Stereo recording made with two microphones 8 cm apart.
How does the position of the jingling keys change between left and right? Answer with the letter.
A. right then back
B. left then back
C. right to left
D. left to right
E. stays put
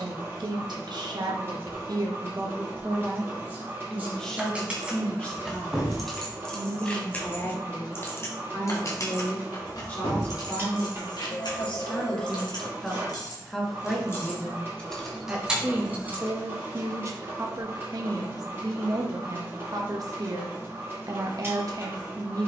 B.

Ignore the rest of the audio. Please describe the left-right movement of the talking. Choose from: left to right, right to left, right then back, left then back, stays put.
left then back.